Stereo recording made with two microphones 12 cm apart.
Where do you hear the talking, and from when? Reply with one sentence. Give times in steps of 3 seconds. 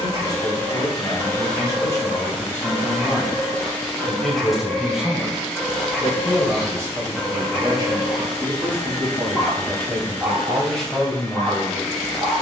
You can hear the talking on the left from 0 s, in the centre from 3 s, on the right from 6 s and in the centre from 9 s.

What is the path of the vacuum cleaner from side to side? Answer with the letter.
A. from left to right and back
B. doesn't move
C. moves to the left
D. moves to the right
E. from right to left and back
B.